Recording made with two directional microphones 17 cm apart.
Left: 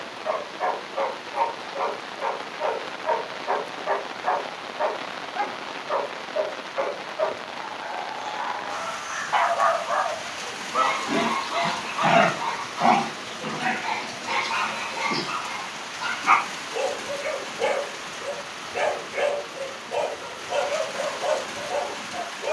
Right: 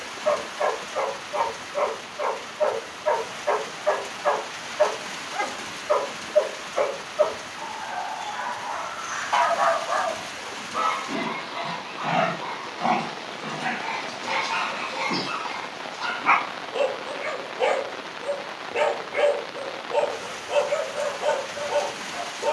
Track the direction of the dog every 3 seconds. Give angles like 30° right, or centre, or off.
30° right, 30° right, 30° right, 10° left, 20° left, 20° right, 30° right, 30° right.